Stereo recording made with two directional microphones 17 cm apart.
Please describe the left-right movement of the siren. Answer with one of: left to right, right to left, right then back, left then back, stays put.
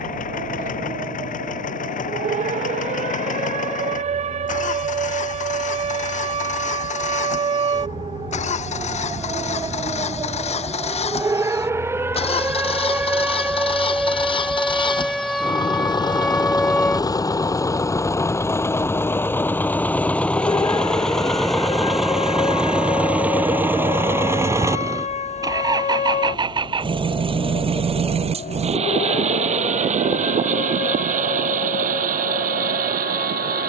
right to left.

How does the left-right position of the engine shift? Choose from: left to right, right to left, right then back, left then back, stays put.
left to right.